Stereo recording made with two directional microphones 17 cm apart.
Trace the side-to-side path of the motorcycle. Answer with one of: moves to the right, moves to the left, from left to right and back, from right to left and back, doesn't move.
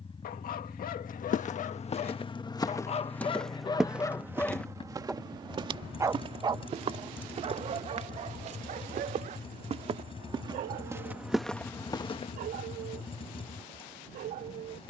doesn't move.